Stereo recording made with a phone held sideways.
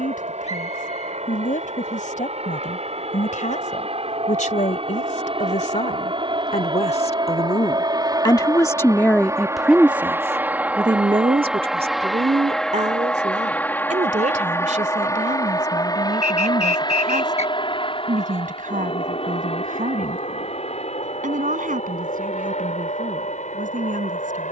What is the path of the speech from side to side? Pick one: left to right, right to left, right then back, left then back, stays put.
left to right.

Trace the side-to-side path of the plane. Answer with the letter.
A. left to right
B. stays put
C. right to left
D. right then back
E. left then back
C.